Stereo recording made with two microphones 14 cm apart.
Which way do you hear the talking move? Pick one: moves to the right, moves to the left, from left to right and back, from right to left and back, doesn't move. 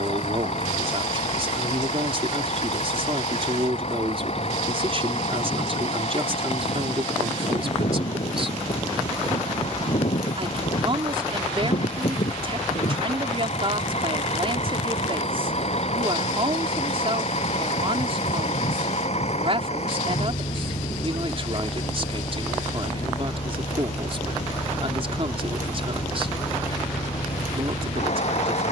doesn't move.